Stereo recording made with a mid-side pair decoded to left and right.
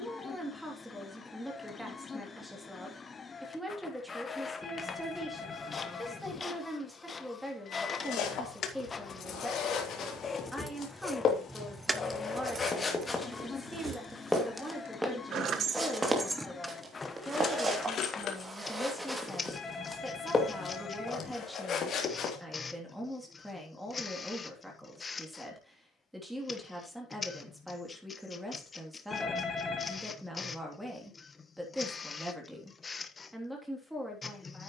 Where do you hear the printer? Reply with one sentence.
In this clip you hear the printer on the left.